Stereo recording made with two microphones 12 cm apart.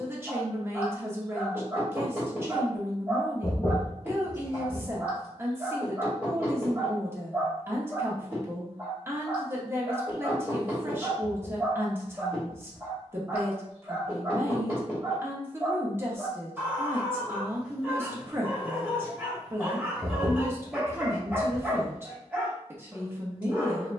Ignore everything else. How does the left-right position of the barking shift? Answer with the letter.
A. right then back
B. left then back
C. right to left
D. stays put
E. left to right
D.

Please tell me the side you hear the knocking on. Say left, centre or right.
left.